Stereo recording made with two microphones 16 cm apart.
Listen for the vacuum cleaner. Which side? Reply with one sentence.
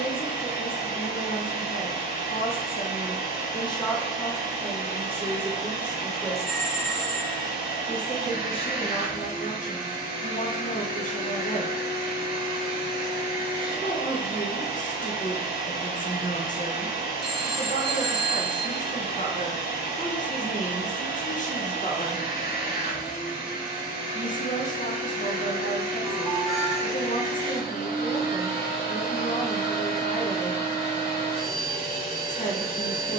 You can hear the vacuum cleaner on the left.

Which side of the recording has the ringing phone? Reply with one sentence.
In this clip you hear the ringing phone in the centre.